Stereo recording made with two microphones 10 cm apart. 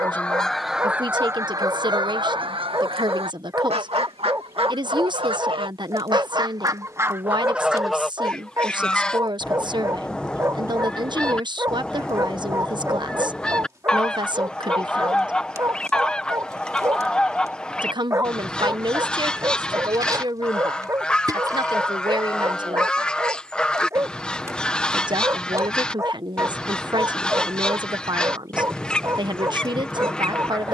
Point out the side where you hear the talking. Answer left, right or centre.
right.